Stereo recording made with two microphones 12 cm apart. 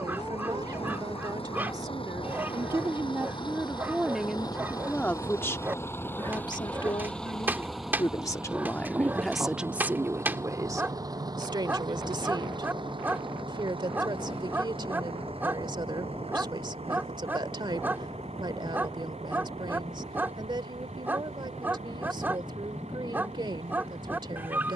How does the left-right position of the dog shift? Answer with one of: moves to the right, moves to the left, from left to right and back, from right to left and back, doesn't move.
doesn't move.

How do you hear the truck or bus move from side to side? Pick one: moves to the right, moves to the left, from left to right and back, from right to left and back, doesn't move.
moves to the right.